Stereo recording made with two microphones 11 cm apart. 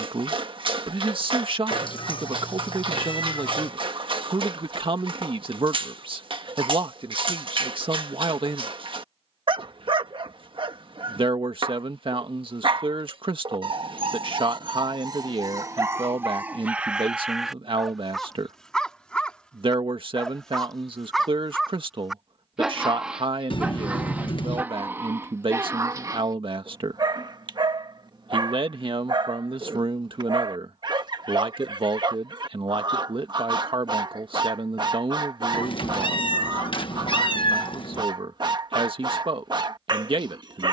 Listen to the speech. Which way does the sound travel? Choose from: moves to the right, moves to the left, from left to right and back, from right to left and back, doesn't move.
doesn't move.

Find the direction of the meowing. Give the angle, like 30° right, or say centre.
50° left.